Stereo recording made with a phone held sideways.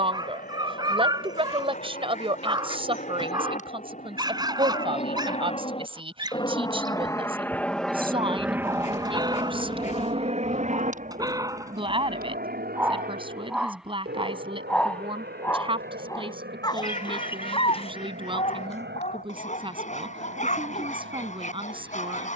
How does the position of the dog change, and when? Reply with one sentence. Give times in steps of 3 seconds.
In this clip you hear the dog on the right from 0 s, in the centre from 12 s and on the left from 15 s.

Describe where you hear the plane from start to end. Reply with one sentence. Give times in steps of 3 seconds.
You can hear the plane on the left from 0 s, in the centre from 6 s and on the right from 9 s.